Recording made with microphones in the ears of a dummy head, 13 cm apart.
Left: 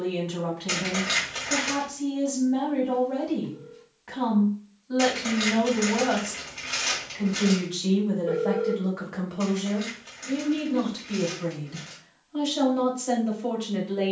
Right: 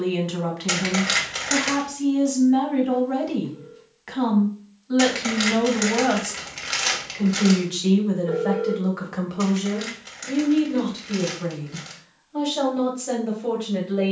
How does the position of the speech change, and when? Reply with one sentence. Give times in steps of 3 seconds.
In this clip you hear the speech on the right from 0 s and in the centre from 9 s.